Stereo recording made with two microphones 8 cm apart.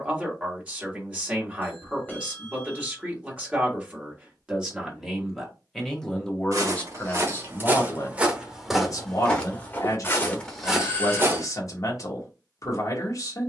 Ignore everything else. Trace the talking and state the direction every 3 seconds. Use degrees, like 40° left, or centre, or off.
20° right, 10° right, 30° left, 50° left, 50° left.